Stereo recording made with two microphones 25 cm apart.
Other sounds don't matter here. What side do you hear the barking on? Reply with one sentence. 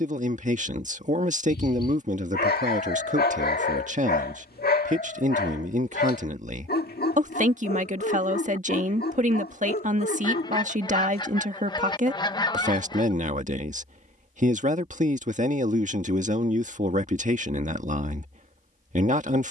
In this clip you hear the barking on the left.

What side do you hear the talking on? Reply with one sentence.
You can hear the talking on the right.